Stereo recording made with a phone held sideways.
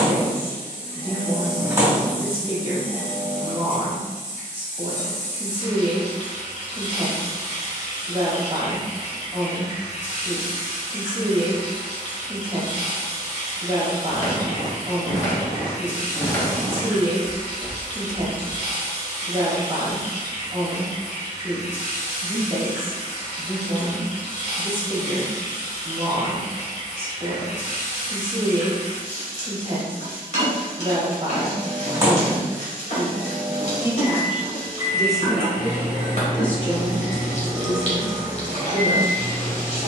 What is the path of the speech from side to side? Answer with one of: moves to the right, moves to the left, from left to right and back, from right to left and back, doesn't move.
moves to the left.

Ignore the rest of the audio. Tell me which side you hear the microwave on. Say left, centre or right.
right.